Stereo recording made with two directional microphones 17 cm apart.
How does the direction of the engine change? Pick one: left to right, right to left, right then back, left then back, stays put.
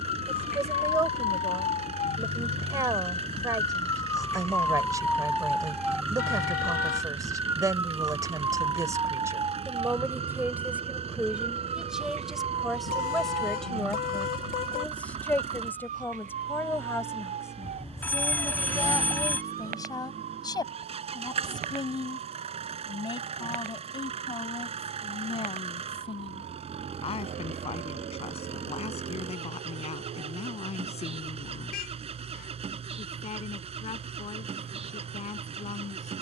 stays put.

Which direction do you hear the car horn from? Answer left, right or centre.
left.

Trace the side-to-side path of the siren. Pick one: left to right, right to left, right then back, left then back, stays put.
left to right.